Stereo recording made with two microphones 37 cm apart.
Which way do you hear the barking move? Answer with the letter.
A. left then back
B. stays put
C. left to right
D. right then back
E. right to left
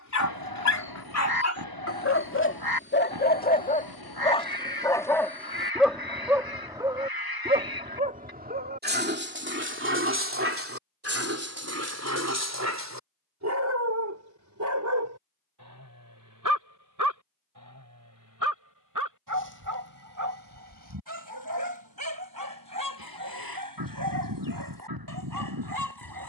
C.